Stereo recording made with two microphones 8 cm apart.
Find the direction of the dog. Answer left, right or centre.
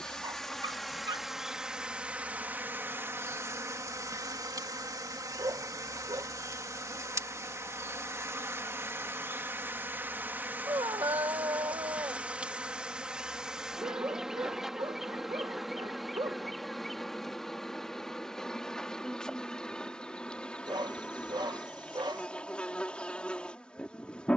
right.